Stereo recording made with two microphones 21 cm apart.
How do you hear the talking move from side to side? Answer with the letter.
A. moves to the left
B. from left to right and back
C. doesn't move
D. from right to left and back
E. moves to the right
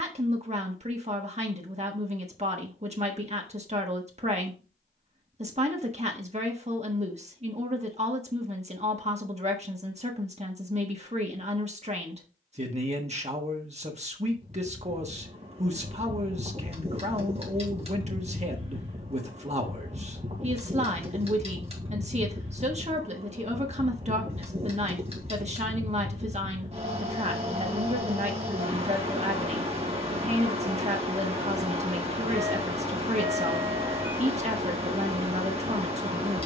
C.